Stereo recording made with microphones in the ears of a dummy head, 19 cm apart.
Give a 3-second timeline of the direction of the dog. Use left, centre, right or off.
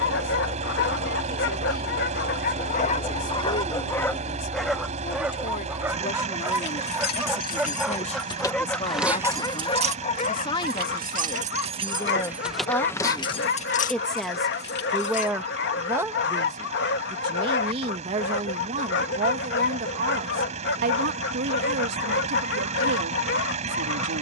left, centre, centre, left, left, left, left, left.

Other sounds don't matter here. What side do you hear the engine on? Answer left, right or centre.
right.